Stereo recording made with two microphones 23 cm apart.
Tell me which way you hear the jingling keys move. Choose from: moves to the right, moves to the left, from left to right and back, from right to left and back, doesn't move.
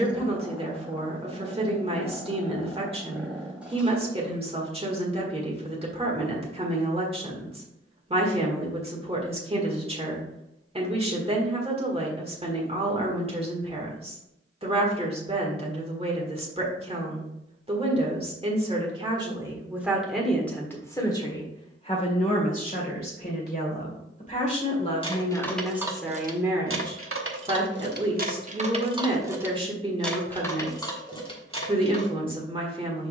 from left to right and back.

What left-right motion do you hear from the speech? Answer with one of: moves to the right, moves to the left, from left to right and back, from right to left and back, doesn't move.
from right to left and back.